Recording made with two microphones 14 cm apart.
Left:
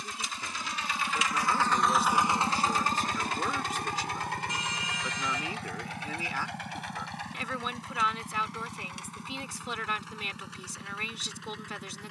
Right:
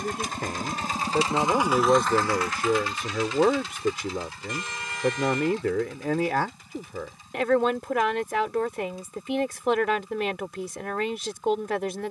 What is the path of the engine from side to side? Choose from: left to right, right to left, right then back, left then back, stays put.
right to left.